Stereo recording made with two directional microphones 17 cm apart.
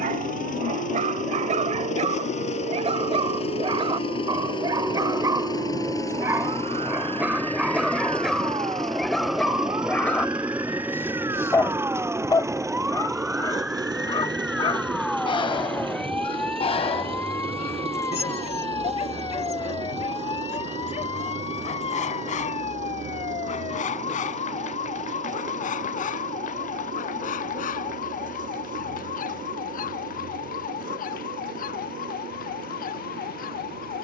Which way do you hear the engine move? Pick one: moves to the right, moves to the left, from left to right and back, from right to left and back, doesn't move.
moves to the right.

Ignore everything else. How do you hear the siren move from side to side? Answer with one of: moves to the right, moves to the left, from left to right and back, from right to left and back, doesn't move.
moves to the left.